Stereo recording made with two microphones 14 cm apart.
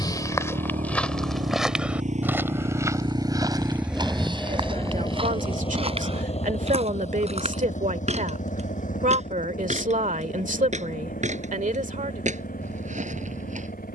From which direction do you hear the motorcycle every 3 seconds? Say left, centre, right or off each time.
right, centre, left, left, left.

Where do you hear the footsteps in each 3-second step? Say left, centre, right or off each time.
centre, right, right, right, right.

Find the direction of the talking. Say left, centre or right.
right.